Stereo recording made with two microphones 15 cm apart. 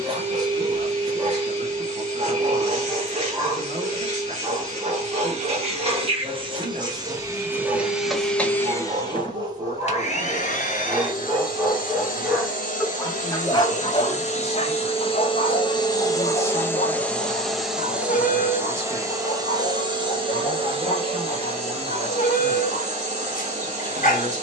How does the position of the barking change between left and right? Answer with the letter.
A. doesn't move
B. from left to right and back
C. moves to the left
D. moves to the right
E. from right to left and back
C.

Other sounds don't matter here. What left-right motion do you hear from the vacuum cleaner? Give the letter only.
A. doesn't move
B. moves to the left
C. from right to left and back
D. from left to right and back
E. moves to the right
C.